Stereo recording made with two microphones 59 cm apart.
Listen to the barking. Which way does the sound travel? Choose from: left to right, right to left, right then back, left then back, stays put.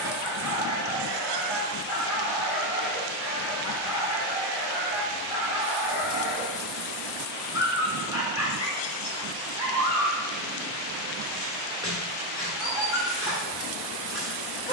stays put.